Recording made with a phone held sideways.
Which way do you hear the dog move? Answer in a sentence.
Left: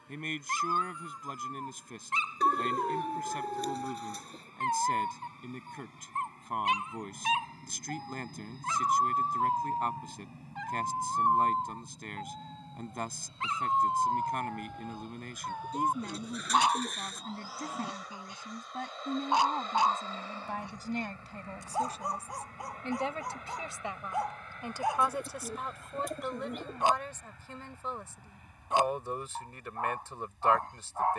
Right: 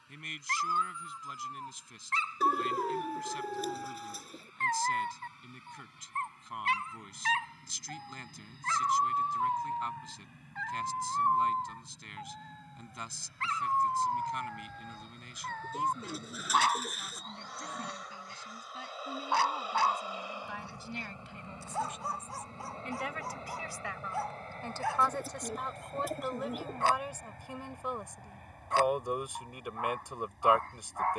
You can hear the dog stay in one place.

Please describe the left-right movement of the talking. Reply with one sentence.
In this clip you hear the talking move from left to right.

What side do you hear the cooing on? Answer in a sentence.
You can hear the cooing in the centre.